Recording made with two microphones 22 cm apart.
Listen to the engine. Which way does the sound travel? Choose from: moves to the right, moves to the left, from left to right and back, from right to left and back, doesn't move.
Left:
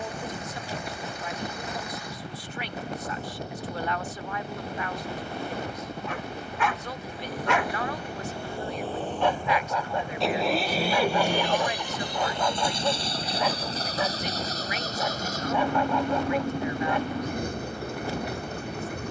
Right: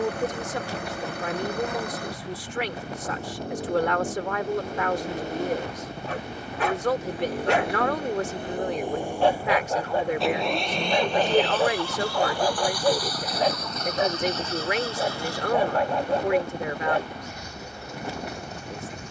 moves to the left.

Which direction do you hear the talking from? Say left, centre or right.
right.